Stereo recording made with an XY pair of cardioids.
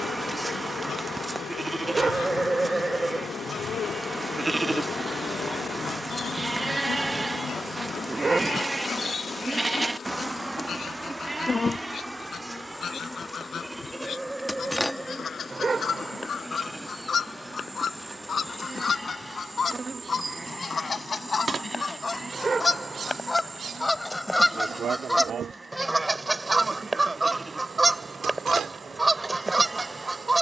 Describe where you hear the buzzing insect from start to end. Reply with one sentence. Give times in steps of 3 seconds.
You can hear the buzzing insect on the left from 0 s, in the centre from 12 s and on the right from 18 s.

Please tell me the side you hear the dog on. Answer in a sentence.
You can hear the dog on the right.